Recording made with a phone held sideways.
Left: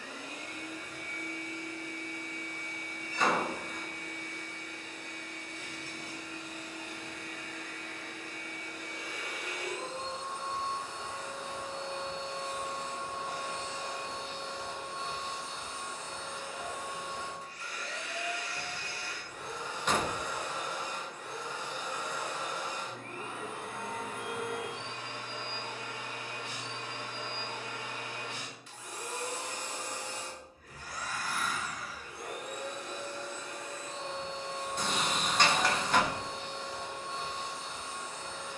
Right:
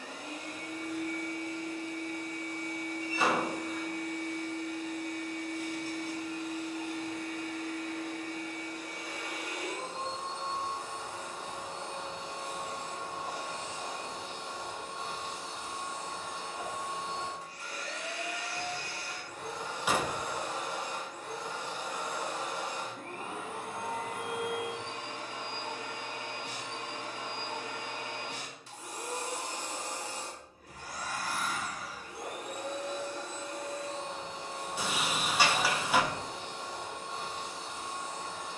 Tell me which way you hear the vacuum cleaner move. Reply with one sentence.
In this clip you hear the vacuum cleaner stay put.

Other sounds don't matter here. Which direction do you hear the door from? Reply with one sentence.
You can hear the door in the centre.